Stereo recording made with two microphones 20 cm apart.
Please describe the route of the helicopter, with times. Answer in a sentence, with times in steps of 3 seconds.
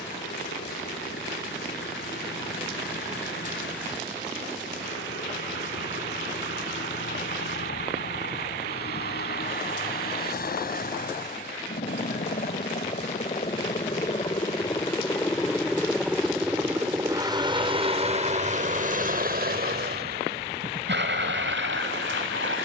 You can hear the helicopter on the left from 0 s, in the centre from 15 s and on the right from 18 s.